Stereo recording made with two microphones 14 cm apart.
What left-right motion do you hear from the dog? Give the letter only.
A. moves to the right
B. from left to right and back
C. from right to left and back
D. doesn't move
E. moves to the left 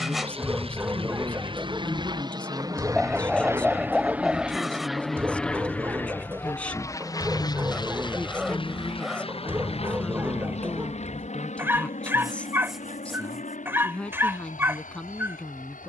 D.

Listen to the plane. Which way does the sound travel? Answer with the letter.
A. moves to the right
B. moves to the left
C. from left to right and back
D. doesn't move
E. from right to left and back
B.